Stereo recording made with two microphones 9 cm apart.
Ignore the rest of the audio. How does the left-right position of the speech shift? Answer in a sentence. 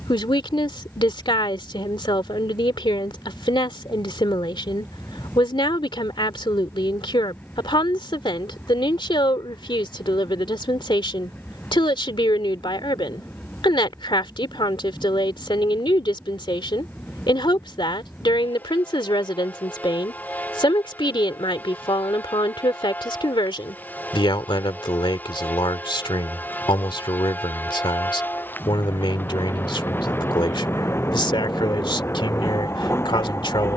In this clip you hear the speech stay put.